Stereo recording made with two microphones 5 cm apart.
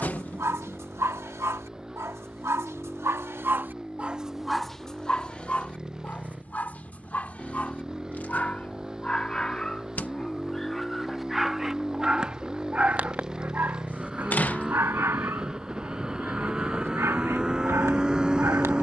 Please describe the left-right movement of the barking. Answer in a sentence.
In this clip you hear the barking move from right to left and back again.